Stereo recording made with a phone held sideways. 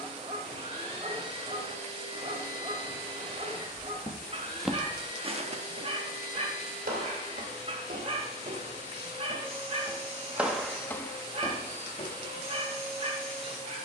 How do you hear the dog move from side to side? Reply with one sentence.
In this clip you hear the dog stay put.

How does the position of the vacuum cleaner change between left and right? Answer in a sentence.
In this clip you hear the vacuum cleaner stay put.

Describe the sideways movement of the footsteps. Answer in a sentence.
In this clip you hear the footsteps go right and come back.